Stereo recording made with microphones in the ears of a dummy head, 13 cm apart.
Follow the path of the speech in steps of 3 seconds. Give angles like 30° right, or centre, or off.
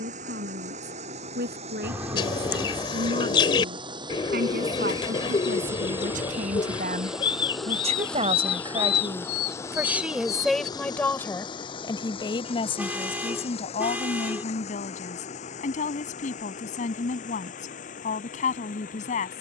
80° right, 70° right, 50° right, centre, 40° left, 60° left, 60° left.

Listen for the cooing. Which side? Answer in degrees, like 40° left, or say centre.
30° left.